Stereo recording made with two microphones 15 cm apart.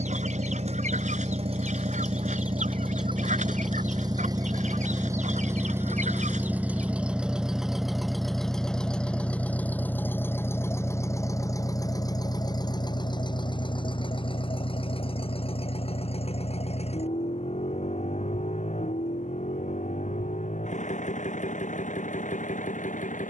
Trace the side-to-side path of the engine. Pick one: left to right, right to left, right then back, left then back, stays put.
right to left.